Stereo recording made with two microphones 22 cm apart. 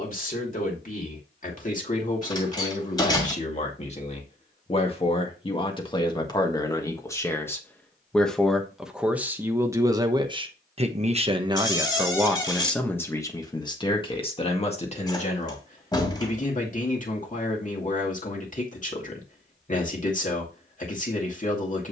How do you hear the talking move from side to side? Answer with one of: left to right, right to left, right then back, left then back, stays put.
right then back.